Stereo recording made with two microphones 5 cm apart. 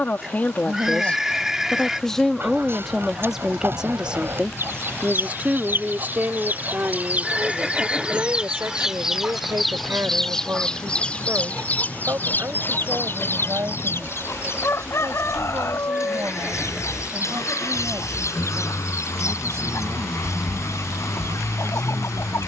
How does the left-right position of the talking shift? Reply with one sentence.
In this clip you hear the talking go from the left side to the right.